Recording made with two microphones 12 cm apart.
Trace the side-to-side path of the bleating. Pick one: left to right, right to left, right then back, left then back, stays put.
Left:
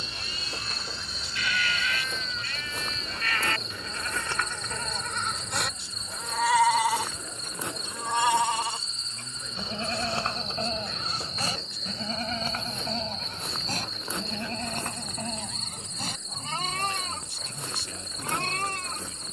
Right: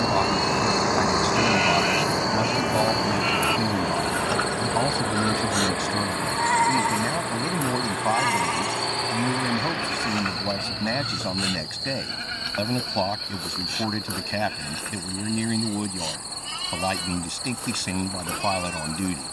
right to left.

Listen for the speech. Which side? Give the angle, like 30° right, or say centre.
80° right.